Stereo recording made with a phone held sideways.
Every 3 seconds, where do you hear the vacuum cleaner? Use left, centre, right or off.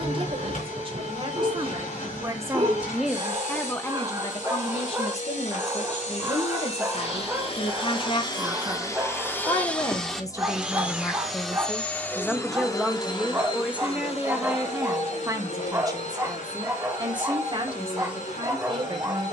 left, left, left, centre, left, left, left.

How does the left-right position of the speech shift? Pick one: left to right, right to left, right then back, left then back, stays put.
left then back.